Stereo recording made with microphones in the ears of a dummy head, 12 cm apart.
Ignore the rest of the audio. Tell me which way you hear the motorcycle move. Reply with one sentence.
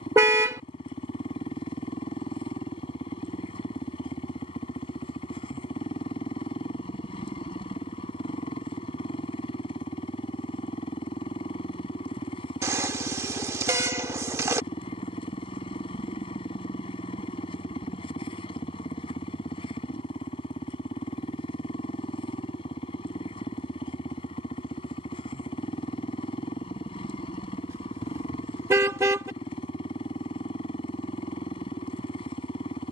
In this clip you hear the motorcycle stay put.